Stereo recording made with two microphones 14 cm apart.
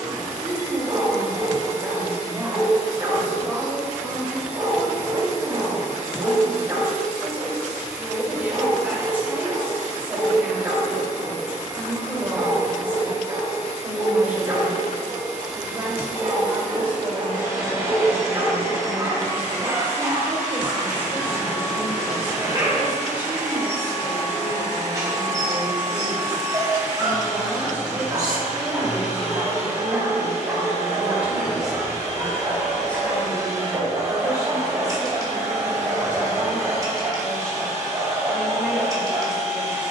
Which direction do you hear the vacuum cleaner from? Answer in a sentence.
In this clip you hear the vacuum cleaner on the right.